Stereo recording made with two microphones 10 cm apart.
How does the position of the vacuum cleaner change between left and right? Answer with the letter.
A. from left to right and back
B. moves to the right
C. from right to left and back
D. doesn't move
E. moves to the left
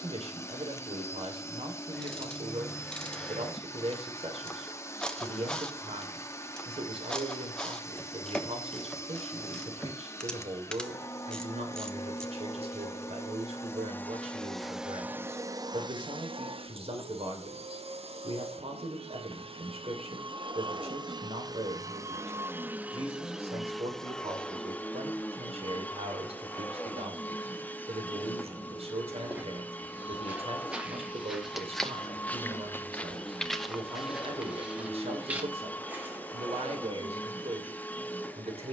A.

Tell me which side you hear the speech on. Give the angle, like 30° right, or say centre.
70° right.